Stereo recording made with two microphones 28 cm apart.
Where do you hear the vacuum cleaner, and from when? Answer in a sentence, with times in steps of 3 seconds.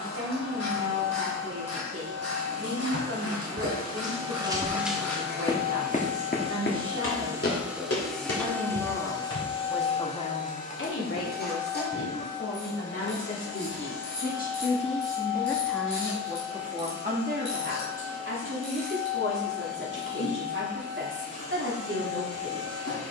In this clip you hear the vacuum cleaner on the right from 0 s, in the centre from 6 s and on the left from 9 s.